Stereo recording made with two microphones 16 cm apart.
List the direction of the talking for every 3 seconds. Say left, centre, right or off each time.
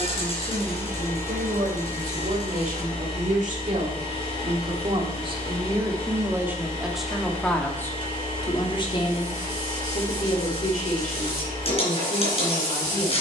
right, right, centre, left, left.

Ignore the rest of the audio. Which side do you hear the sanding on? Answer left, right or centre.
left.